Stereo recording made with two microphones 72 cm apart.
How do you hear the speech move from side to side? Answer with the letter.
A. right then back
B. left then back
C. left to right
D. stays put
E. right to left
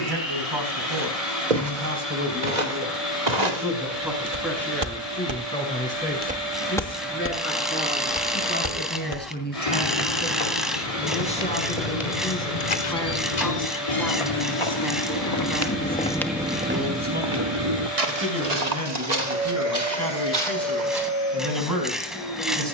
B.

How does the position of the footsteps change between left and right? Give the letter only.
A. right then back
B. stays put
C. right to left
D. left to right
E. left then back
E.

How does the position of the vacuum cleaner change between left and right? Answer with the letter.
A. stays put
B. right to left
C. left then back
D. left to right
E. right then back
A.